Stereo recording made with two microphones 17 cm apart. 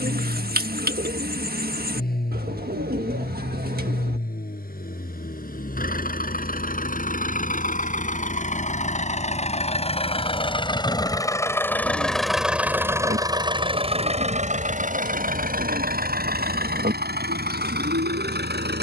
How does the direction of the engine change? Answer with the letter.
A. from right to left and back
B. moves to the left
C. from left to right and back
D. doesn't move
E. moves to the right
E.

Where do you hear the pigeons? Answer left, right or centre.
right.